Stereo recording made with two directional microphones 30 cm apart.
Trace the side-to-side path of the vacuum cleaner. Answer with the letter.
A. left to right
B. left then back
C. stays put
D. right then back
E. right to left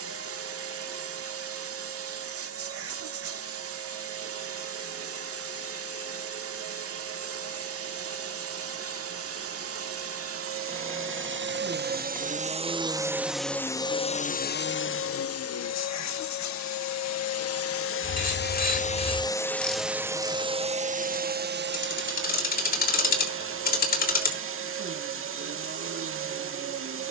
B.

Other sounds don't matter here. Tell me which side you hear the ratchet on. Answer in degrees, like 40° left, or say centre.
30° left.